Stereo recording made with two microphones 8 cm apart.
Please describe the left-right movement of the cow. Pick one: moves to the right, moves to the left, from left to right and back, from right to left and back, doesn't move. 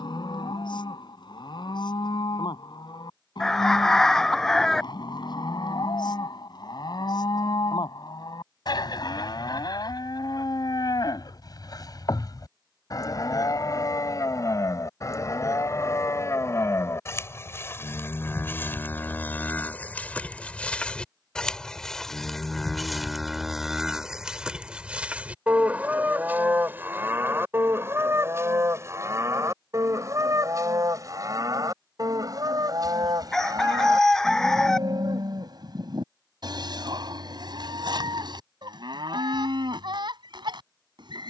moves to the right.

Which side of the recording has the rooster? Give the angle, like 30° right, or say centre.
10° left.